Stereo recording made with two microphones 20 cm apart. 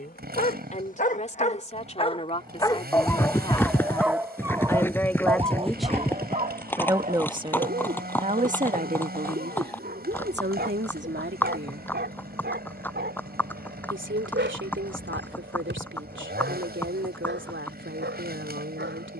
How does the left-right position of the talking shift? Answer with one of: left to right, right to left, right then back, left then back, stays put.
left to right.